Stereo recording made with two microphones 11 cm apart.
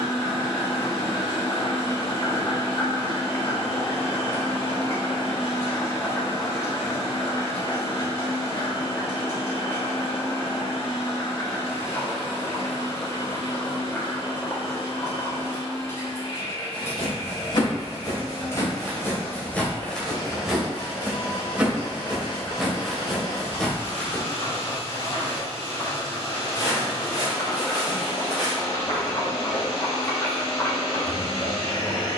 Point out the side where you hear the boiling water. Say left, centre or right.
left.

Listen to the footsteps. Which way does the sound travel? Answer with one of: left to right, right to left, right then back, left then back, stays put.
right then back.